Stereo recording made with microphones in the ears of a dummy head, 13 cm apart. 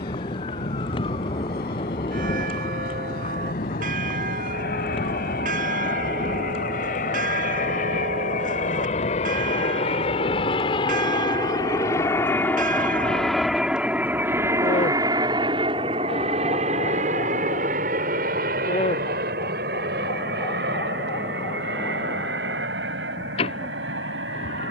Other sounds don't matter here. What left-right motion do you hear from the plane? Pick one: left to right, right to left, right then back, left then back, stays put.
left to right.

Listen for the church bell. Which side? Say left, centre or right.
right.